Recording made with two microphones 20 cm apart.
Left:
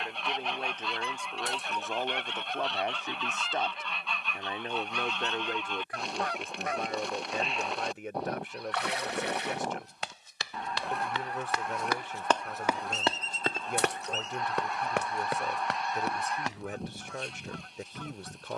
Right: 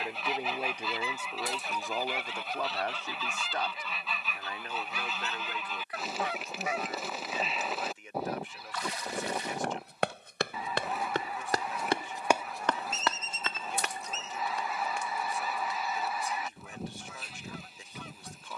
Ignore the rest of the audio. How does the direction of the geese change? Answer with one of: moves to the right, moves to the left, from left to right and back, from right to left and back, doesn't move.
doesn't move.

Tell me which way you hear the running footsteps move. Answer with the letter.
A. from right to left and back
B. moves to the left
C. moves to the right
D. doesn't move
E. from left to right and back
B.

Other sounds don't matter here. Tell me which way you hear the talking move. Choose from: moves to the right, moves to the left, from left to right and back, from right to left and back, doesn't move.
moves to the left.